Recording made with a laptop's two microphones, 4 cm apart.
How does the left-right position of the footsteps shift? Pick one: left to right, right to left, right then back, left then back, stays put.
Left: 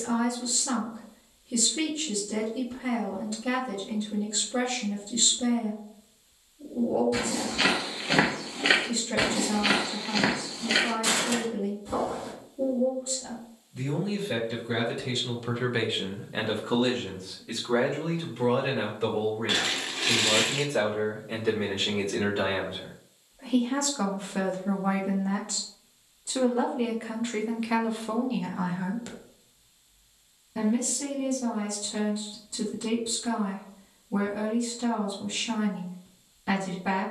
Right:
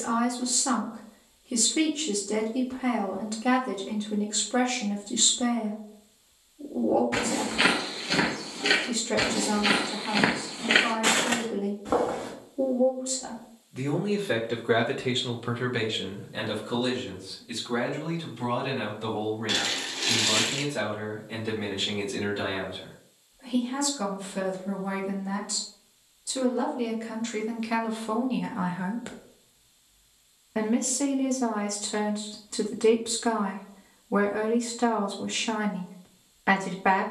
left then back.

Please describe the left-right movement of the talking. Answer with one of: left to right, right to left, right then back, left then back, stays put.
left then back.